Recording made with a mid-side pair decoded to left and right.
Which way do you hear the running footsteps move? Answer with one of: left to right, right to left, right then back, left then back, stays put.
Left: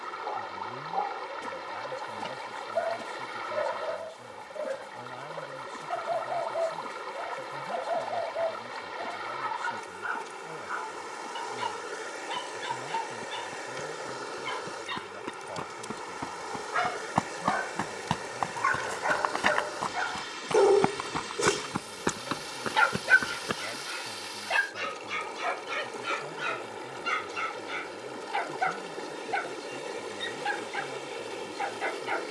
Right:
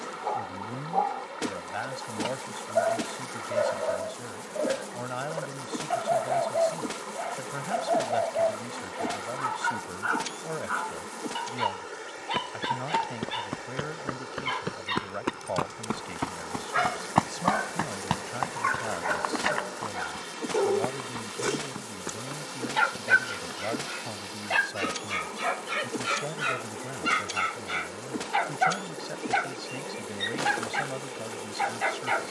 right to left.